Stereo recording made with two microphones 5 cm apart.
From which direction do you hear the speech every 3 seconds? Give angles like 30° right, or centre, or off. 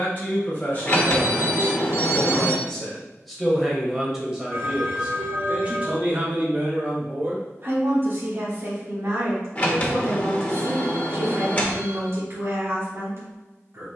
30° left, 10° right, 40° right, 60° right, 60° right.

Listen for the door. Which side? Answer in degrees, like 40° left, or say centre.
30° left.